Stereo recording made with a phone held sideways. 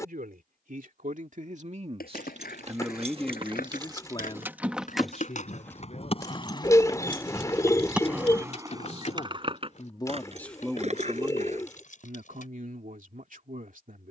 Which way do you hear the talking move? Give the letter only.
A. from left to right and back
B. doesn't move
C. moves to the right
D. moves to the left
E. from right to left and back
E.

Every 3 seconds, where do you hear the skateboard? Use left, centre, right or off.
left, left, centre, right, off.